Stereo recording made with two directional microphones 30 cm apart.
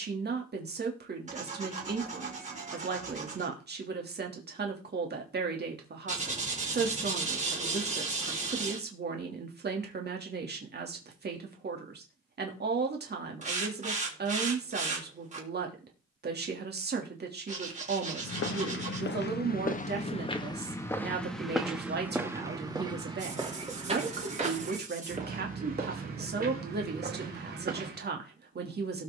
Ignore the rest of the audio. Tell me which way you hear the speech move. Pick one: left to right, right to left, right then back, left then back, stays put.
stays put.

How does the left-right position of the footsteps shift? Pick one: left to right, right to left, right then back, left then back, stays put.
left to right.